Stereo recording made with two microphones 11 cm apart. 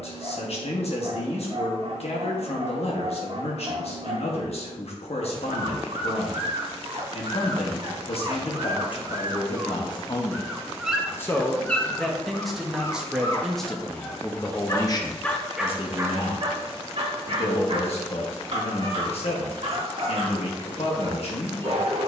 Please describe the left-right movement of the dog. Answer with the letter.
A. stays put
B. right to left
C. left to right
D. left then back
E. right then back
D.